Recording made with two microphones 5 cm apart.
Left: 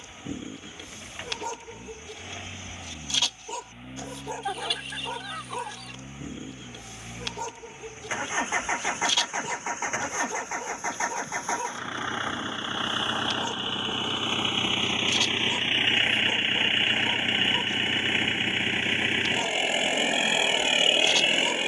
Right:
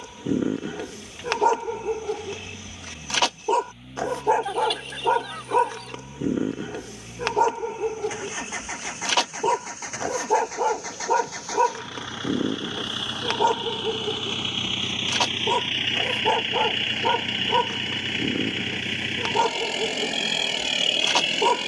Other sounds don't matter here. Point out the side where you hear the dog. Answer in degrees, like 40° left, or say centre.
60° right.